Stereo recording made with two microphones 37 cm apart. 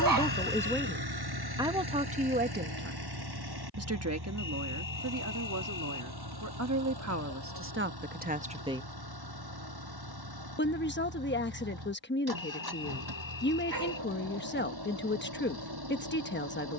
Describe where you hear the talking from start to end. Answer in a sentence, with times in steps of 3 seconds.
In this clip you hear the talking in the centre from 0 s, on the right from 3 s and on the left from 9 s.